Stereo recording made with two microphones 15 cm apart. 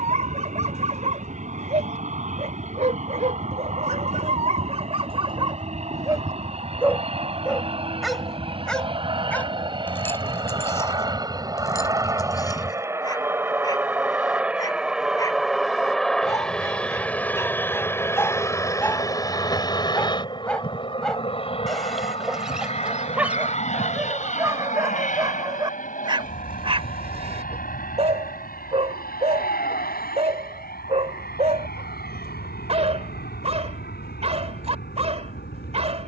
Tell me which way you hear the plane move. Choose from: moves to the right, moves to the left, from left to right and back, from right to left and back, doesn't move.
moves to the left.